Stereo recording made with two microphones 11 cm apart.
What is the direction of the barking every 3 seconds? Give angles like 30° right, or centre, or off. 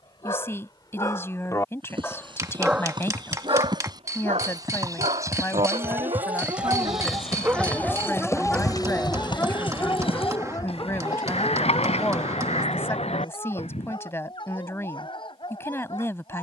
20° left, 70° right, 20° right, 30° left, 50° left, 50° left.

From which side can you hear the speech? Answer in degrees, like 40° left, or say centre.
20° left.